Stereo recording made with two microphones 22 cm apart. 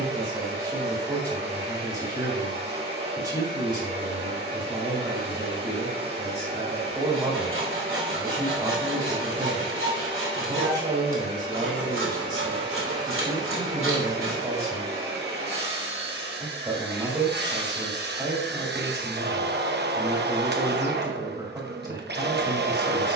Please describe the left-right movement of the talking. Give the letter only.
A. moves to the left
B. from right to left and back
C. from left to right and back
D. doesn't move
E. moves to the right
D.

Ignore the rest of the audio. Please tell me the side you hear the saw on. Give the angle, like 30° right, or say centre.
70° right.